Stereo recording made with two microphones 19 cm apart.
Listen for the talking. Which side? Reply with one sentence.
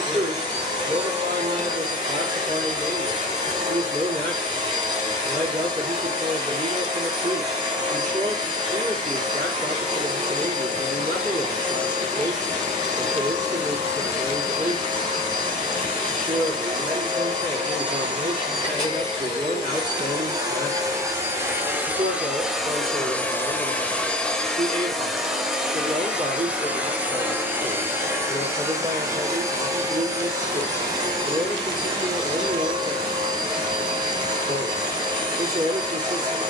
In this clip you hear the talking on the right.